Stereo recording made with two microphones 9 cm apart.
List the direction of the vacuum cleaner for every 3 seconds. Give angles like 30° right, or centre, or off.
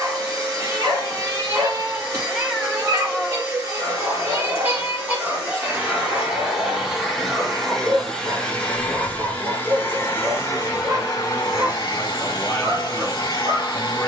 30° right, 30° right, centre, 30° left, 50° left.